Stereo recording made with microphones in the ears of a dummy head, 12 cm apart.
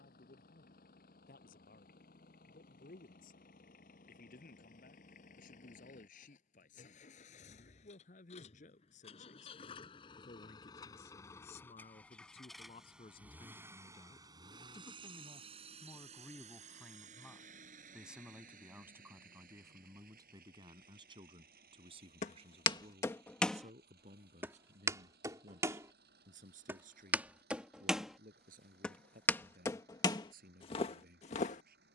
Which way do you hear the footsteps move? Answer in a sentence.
In this clip you hear the footsteps go right and come back.